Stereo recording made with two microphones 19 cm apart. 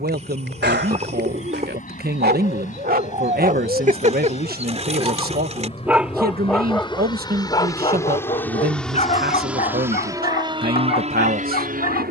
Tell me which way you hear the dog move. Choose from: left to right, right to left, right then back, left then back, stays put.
right to left.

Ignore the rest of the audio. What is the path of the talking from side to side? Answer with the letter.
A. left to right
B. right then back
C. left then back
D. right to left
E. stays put
E.